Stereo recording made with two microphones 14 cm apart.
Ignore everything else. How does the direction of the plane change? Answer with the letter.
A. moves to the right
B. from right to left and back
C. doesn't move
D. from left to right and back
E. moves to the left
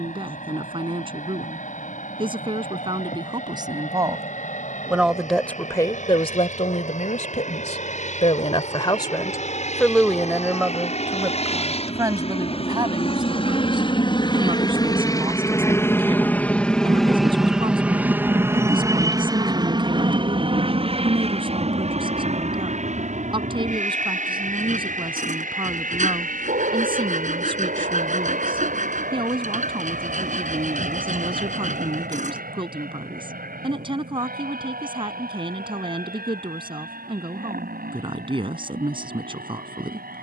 A.